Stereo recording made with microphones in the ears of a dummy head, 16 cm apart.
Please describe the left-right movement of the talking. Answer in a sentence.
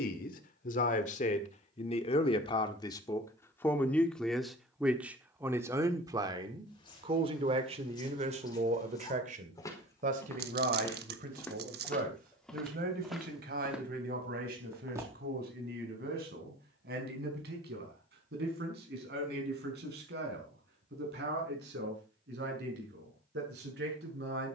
In this clip you hear the talking move to the right.